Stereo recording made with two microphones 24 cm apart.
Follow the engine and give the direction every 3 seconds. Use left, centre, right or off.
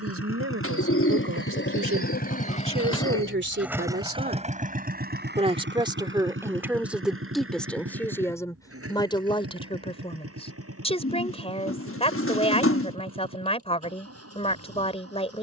left, right, right, right, right.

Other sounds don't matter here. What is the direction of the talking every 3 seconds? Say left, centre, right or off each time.
right, right, centre, left, left.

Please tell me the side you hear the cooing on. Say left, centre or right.
left.